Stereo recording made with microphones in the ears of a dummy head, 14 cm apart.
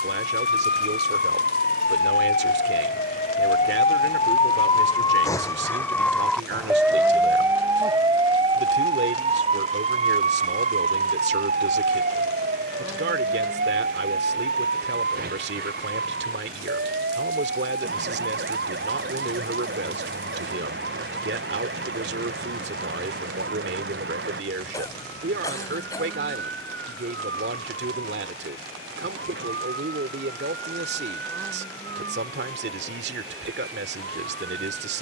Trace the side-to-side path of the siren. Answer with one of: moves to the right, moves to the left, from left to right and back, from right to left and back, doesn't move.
moves to the right.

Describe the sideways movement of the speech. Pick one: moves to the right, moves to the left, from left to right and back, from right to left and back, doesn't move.
doesn't move.